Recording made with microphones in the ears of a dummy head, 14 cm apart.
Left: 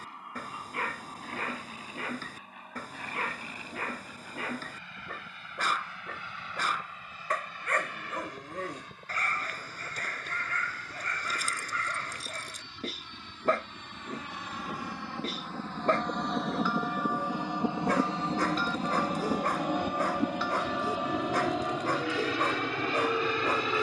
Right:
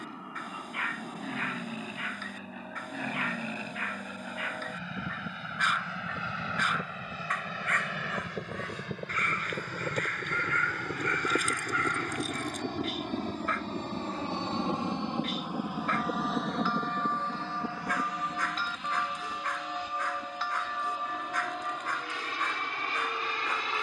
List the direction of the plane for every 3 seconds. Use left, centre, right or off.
right, right, right, right, right, centre, left, left.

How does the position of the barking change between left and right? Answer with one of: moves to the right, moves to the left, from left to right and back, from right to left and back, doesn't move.
doesn't move.